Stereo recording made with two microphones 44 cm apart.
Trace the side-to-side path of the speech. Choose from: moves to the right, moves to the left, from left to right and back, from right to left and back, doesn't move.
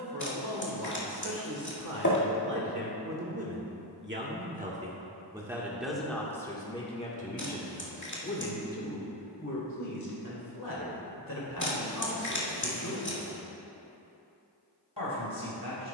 moves to the left.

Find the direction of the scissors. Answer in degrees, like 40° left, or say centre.
40° left.